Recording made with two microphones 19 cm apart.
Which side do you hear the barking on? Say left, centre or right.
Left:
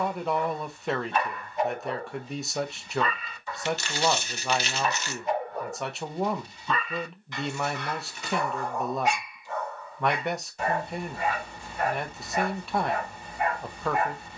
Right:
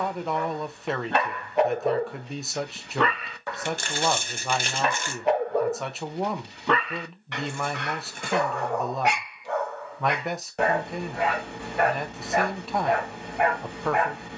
right.